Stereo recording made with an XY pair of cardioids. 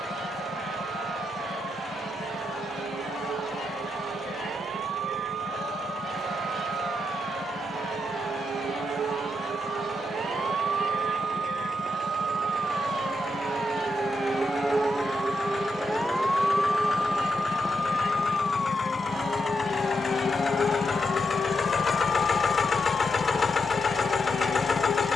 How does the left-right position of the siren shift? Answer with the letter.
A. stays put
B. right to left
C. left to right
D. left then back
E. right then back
B.